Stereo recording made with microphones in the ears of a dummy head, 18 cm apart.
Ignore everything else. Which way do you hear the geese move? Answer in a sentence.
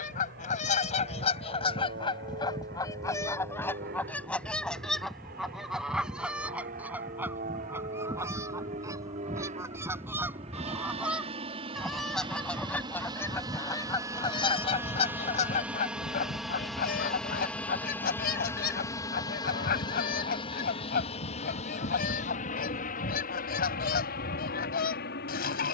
In this clip you hear the geese go right and come back.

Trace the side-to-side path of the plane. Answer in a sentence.
You can hear the plane go from the right side to the left.